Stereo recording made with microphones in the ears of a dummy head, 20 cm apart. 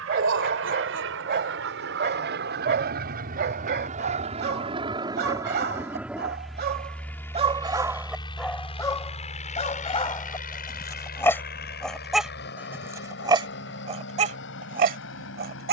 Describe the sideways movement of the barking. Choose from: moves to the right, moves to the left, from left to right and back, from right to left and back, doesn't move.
from right to left and back.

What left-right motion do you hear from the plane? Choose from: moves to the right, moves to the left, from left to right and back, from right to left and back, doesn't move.
moves to the left.